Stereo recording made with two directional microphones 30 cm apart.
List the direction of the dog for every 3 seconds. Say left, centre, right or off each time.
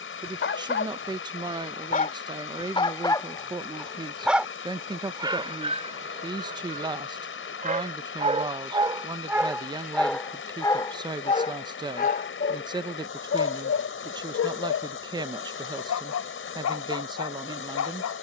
left, centre, right, centre, left, left.